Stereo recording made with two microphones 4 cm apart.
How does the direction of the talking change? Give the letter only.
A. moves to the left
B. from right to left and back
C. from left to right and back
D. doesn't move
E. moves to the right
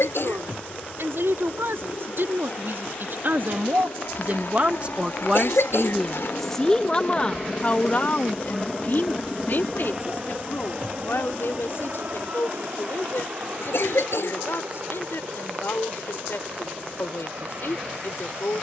A.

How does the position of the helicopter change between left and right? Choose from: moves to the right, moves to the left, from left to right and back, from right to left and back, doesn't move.
moves to the right.